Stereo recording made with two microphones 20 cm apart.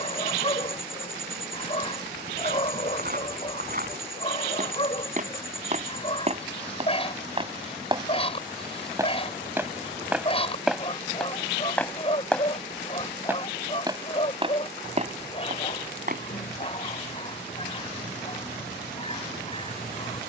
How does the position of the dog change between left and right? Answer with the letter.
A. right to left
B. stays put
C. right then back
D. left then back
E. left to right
B.